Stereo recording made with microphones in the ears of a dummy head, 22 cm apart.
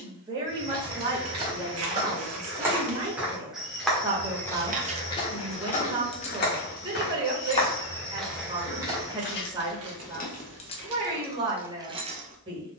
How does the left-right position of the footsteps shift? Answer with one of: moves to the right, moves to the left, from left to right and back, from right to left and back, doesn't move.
from right to left and back.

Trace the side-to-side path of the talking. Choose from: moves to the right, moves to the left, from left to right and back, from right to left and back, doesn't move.
doesn't move.